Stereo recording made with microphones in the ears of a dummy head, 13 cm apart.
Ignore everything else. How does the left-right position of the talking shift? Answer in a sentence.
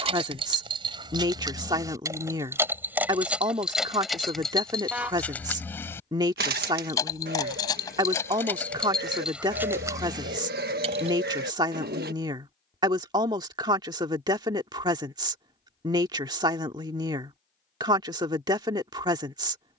You can hear the talking stay in one place.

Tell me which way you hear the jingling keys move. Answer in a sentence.
In this clip you hear the jingling keys go left and come back.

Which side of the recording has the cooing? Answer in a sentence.
You can hear the cooing on the right.